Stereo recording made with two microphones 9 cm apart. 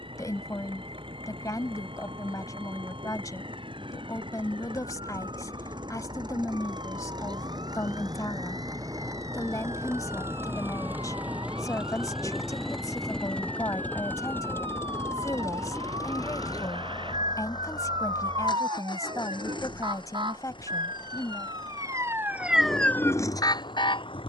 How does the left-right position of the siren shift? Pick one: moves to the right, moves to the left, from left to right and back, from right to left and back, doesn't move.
moves to the left.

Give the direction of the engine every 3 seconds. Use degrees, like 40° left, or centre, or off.
70° right, 60° right, 50° right, 20° right, 10° left, 40° left, 60° left, 70° left.